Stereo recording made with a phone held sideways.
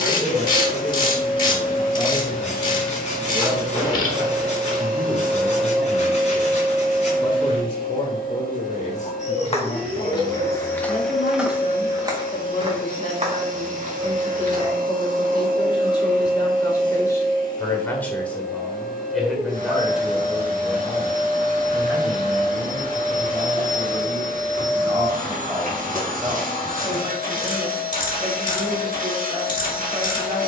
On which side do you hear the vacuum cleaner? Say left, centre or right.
right.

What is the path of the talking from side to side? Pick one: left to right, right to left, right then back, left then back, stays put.
left then back.